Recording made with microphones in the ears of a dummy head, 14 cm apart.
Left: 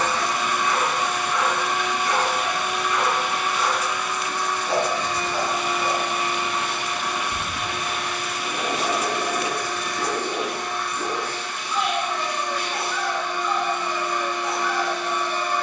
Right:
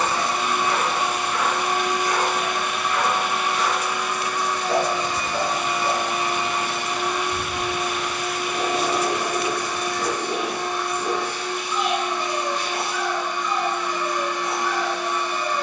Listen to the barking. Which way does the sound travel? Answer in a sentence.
You can hear the barking stay in one place.